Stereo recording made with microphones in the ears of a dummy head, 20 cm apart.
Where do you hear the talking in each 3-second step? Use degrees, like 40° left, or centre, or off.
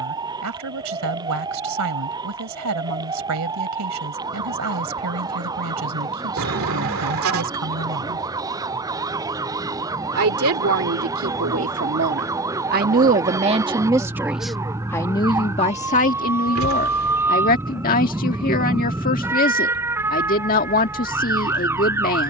80° right, 80° right, 80° right, 60° right, 20° right, 30° left, 40° left, 40° left.